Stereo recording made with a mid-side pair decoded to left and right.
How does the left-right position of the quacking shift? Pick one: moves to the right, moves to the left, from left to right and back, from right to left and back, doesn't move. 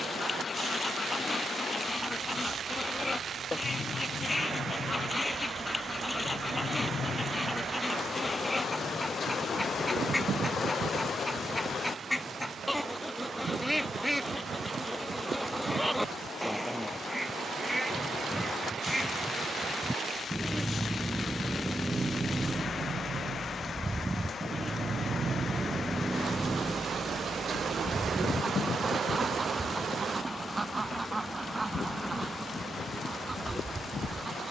moves to the right.